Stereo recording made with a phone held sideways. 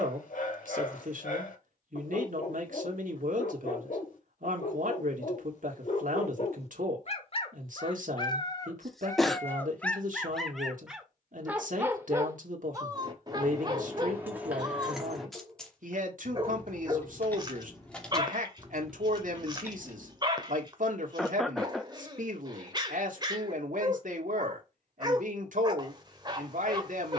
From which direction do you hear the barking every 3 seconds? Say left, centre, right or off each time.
left, left, left, centre, right, right, right, right, right.